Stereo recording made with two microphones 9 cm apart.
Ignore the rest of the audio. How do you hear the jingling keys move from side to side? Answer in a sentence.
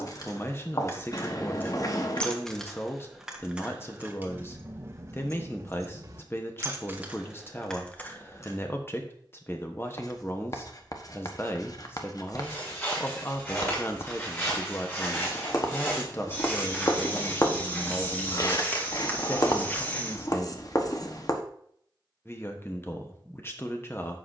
In this clip you hear the jingling keys go right and come back.